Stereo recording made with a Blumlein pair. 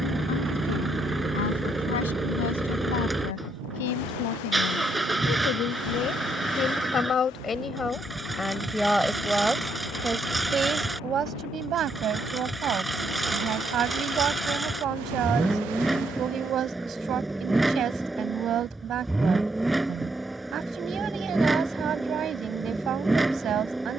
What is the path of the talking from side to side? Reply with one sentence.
You can hear the talking move to the right.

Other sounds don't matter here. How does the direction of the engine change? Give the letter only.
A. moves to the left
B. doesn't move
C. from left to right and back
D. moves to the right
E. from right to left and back
B.